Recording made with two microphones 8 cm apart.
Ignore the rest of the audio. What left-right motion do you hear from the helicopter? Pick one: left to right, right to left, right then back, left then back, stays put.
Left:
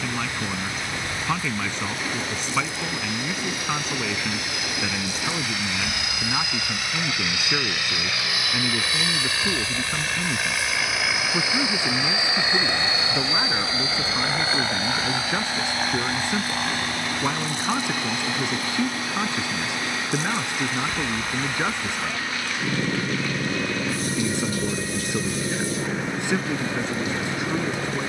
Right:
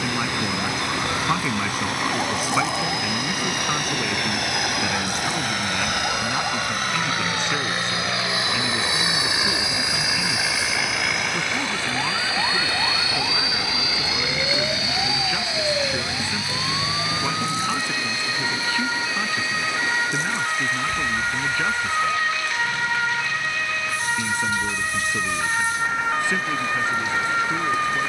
right to left.